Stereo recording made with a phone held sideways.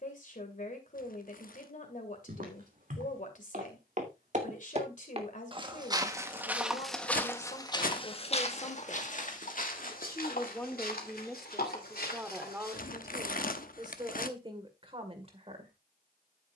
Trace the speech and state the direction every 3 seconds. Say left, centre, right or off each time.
left, left, left, centre, right, right.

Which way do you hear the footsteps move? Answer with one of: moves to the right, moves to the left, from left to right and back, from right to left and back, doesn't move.
moves to the left.